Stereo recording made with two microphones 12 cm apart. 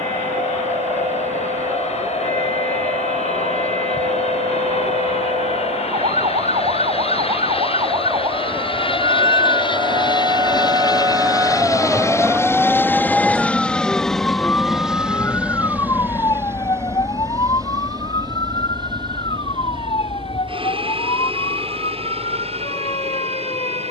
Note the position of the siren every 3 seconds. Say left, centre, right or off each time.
right, right, right, right, centre, left, left, left.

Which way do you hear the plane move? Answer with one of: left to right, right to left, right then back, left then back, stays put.
left to right.